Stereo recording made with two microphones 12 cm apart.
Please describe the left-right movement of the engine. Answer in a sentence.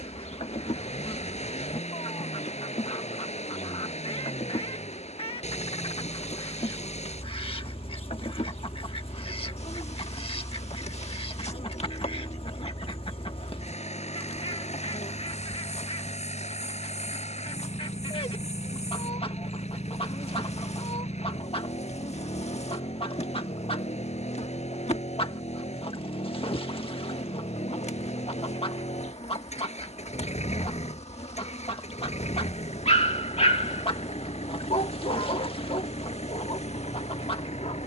You can hear the engine stay put.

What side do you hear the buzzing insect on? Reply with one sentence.
You can hear the buzzing insect on the left.